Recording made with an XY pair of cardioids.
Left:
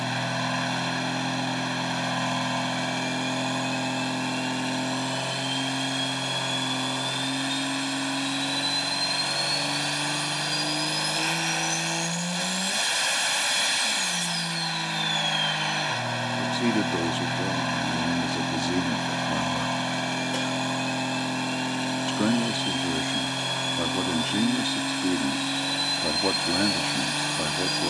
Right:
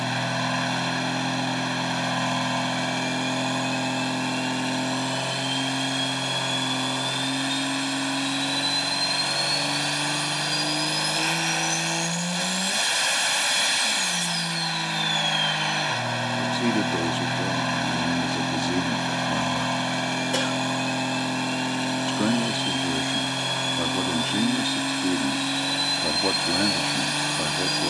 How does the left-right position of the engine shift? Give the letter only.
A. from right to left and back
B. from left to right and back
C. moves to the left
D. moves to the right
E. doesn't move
E.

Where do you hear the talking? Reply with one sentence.
You can hear the talking in the centre.